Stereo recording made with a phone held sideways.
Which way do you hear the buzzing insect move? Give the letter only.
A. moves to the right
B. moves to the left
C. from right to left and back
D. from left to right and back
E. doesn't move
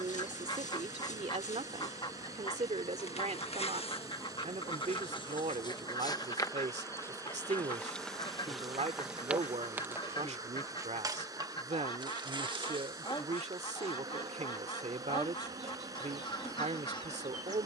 A.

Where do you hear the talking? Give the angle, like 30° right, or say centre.
60° right.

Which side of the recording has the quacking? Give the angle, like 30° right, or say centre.
40° left.